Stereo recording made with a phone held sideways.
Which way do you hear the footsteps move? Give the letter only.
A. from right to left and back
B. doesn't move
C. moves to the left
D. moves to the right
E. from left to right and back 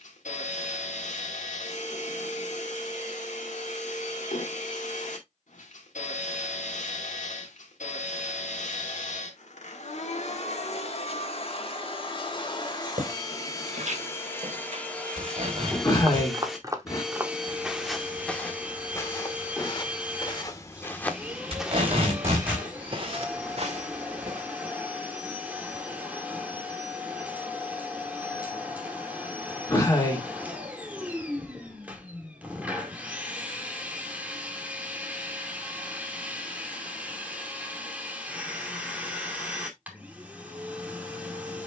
A.